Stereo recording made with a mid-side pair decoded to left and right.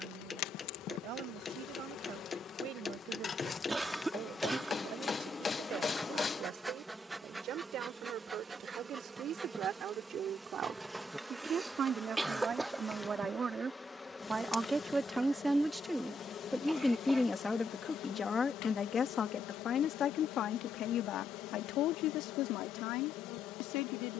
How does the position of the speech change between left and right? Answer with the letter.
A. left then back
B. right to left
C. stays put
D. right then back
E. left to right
B.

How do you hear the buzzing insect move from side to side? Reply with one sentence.
You can hear the buzzing insect move from left to right and back again.